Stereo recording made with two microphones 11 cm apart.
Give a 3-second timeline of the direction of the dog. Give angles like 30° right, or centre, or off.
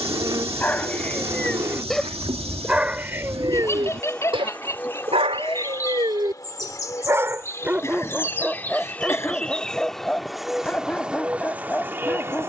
10° left, 40° right, 20° right, 10° left.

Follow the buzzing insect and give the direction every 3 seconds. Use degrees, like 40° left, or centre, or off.
30° right, 20° left, 20° left, centre.